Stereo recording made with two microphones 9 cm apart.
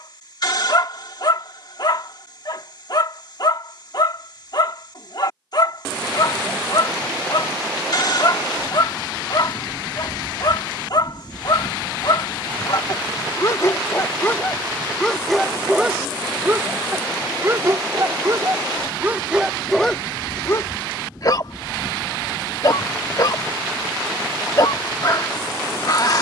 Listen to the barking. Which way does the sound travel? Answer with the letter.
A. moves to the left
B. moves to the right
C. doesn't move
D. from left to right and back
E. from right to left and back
D.